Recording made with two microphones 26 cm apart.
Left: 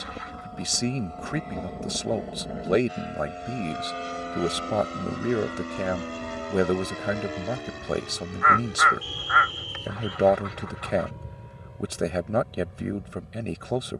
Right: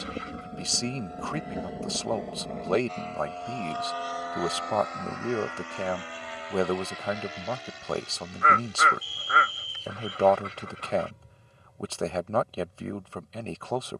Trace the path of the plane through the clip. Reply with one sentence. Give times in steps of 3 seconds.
In this clip you hear the plane in the centre from 0 s and on the left from 3 s.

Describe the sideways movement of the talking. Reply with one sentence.
You can hear the talking stay in one place.